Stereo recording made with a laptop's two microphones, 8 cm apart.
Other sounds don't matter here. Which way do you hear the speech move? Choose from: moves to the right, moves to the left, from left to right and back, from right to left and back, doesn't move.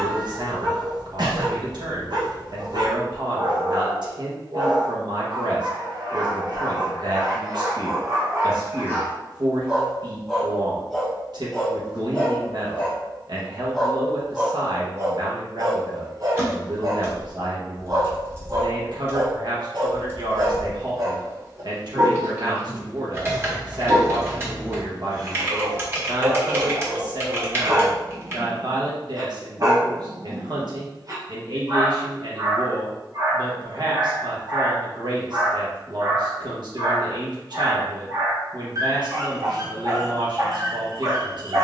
doesn't move.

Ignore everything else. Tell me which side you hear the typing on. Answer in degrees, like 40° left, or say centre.
30° right.